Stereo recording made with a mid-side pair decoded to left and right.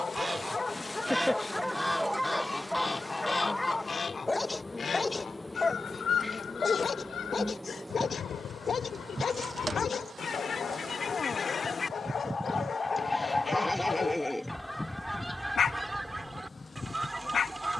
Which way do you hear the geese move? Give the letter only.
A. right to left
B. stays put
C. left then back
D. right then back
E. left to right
C.